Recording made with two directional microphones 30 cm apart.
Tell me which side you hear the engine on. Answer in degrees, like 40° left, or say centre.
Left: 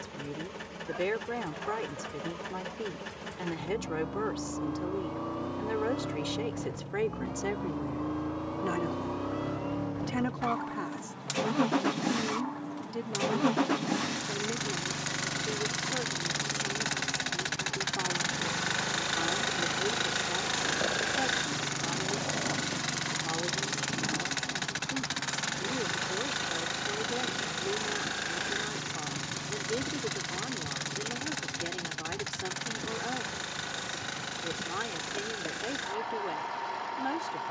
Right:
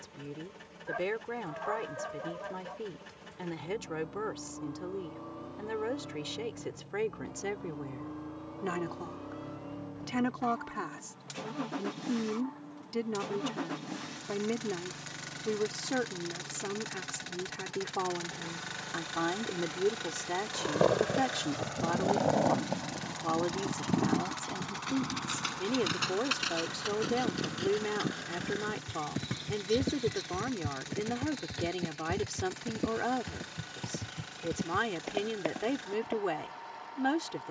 50° left.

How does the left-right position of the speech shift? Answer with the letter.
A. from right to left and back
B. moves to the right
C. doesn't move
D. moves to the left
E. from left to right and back
B.